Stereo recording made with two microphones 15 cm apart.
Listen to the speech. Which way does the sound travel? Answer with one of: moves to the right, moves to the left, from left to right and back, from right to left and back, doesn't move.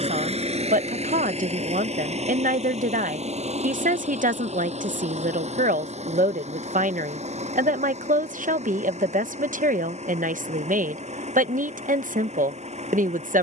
doesn't move.